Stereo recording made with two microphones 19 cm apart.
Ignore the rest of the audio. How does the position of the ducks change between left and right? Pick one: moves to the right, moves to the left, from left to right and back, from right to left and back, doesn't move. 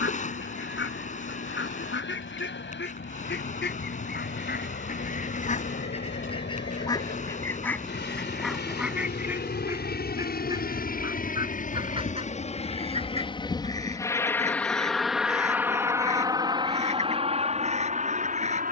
moves to the right.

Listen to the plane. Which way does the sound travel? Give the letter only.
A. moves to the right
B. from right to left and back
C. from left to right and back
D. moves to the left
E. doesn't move
A.